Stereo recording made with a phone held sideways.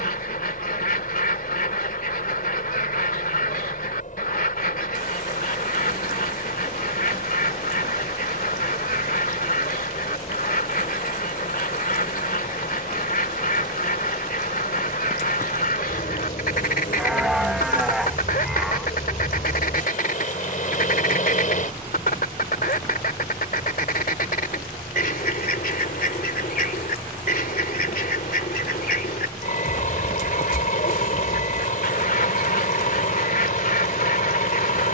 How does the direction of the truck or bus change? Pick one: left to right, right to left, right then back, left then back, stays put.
stays put.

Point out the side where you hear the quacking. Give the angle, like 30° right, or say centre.
60° left.